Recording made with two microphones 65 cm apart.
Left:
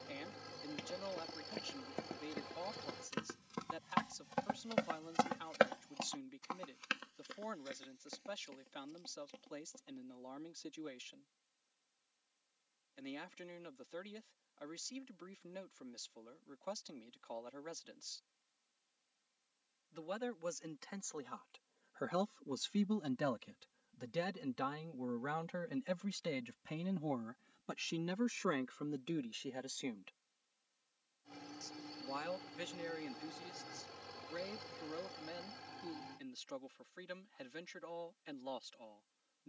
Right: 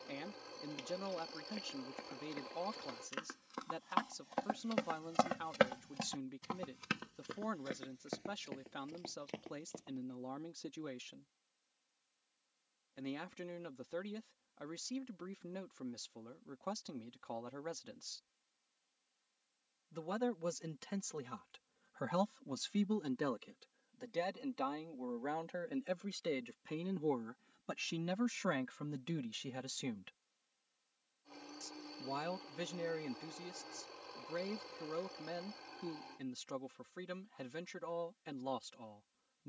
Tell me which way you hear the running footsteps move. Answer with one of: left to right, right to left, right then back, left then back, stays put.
left to right.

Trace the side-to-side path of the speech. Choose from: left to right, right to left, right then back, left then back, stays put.
left then back.